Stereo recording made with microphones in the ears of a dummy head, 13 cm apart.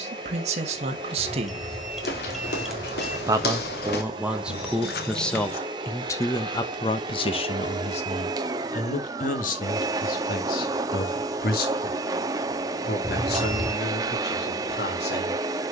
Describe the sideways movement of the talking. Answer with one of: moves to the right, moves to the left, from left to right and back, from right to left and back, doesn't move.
moves to the left.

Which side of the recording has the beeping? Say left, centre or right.
centre.